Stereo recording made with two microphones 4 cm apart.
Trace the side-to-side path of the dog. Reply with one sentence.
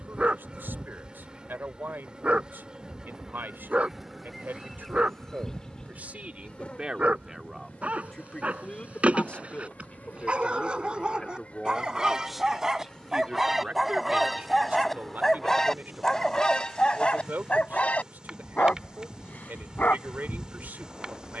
In this clip you hear the dog go from the right side to the left.